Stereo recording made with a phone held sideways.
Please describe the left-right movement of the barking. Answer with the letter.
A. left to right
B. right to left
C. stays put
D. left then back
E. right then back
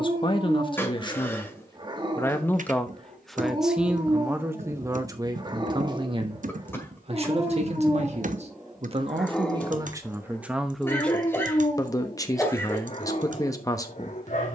B.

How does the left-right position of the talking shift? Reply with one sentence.
In this clip you hear the talking move from left to right and back again.